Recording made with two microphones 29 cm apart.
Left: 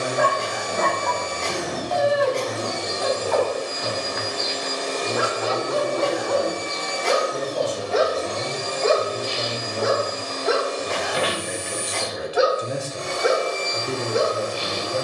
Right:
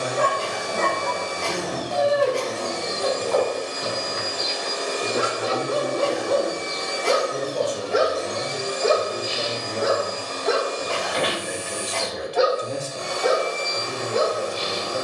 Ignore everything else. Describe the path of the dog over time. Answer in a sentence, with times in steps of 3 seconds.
You can hear the dog on the right from 0 s and in the centre from 9 s.